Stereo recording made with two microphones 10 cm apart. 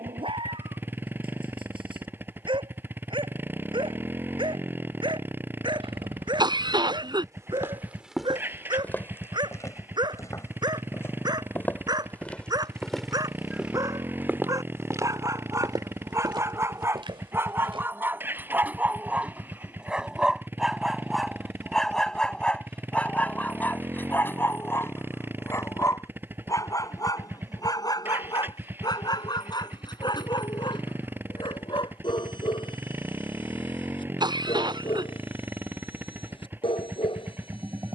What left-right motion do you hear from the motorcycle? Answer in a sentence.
In this clip you hear the motorcycle stay in one place.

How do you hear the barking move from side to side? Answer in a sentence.
In this clip you hear the barking travel towards the left.